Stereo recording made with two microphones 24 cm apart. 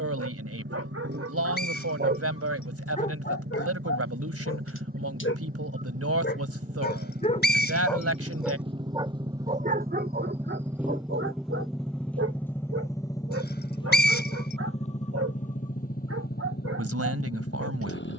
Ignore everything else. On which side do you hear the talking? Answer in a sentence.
You can hear the talking on the right.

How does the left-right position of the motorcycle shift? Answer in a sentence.
In this clip you hear the motorcycle move from right to left.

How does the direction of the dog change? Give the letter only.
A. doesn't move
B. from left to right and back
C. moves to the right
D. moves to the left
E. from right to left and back
E.